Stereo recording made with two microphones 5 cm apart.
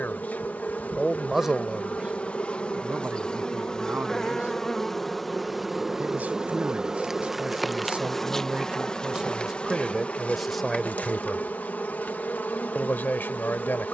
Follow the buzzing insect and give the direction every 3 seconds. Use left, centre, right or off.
left, centre, centre, left, left.